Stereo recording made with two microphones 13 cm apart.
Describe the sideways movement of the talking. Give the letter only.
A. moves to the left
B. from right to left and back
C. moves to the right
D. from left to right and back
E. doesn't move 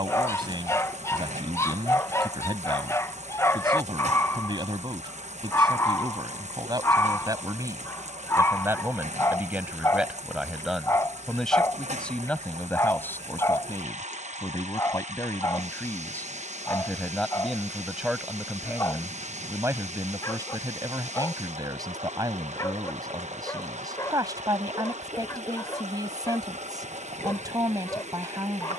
B.